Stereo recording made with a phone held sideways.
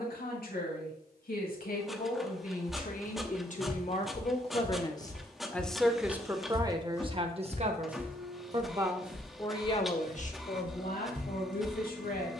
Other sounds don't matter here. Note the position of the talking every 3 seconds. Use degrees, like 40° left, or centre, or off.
70° left, 30° left, 30° right, 50° left.